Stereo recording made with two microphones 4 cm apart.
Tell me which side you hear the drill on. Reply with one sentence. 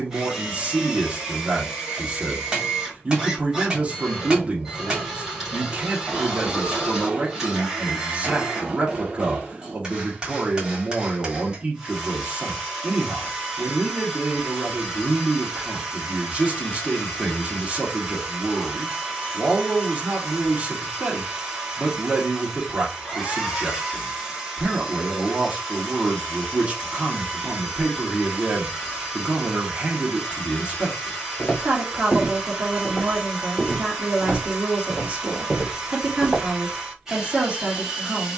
In this clip you hear the drill in the centre.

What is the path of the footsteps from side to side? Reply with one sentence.
You can hear the footsteps travel towards the right.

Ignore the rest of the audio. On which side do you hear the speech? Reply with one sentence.
In this clip you hear the speech on the right.